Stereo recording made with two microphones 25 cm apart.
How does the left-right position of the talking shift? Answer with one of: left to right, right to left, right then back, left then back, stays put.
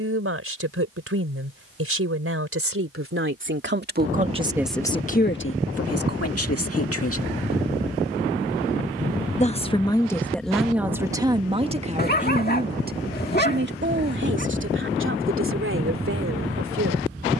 left then back.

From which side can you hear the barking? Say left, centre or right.
left.